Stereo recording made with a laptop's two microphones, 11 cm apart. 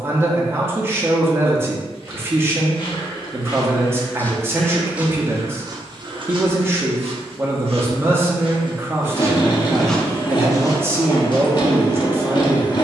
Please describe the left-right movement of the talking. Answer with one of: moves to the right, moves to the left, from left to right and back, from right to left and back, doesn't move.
doesn't move.